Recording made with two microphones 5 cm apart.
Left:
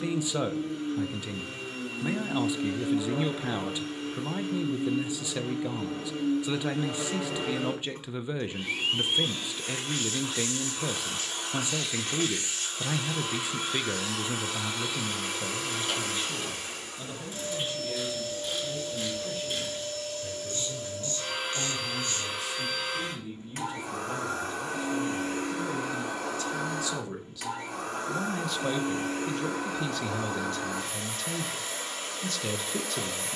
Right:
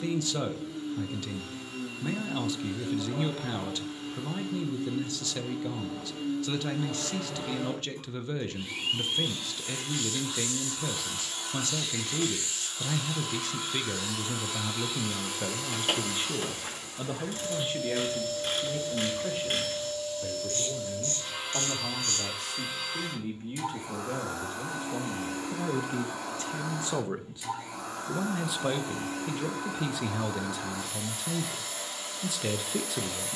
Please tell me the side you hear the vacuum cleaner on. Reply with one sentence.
You can hear the vacuum cleaner on the left.